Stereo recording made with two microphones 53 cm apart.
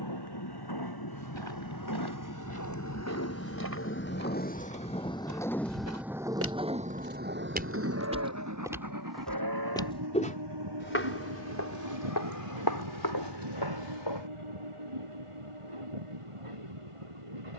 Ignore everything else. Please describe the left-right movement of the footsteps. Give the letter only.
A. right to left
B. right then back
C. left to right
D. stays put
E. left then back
A.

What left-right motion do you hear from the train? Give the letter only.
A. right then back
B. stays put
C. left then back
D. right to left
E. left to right
E.